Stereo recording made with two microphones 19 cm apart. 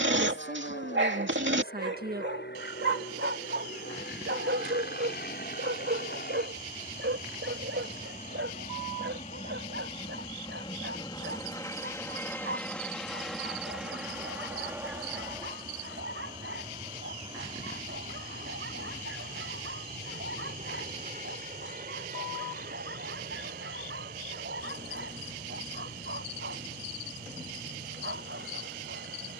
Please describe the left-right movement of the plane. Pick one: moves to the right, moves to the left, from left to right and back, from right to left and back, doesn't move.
moves to the right.